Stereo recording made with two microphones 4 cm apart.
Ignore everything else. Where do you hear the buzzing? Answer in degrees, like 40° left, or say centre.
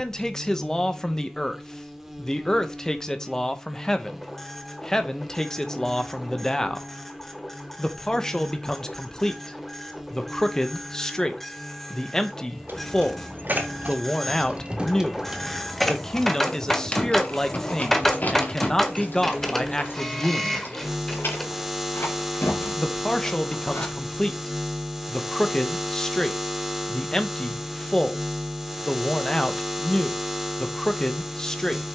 10° right.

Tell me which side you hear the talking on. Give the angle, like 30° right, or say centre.
10° left.